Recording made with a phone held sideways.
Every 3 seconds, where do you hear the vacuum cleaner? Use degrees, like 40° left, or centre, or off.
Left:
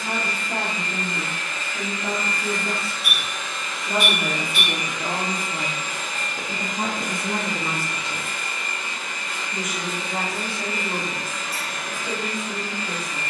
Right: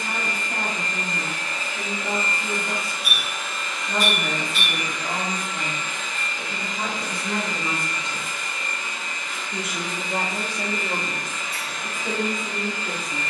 30° right, 10° left, 50° left, 70° left, 80° left.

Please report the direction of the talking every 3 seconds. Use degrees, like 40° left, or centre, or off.
70° left, 60° left, 20° left, 40° right, 60° right.